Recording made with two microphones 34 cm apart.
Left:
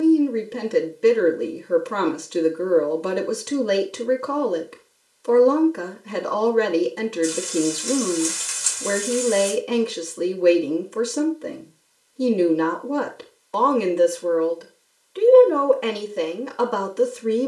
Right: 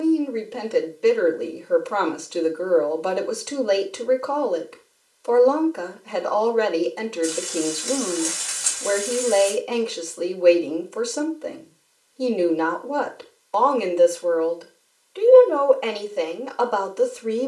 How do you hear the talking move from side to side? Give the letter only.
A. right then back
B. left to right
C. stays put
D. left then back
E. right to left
C.